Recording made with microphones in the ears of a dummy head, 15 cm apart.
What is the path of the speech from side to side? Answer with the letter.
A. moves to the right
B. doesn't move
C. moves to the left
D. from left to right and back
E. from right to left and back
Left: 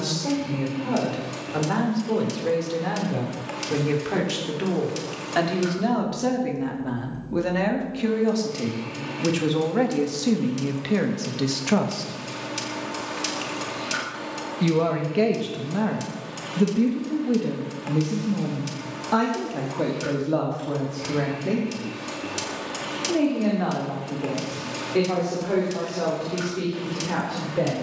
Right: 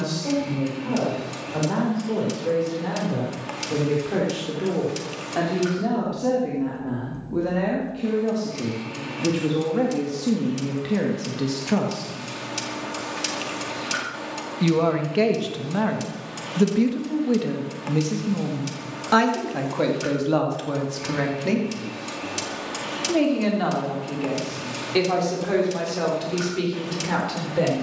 A.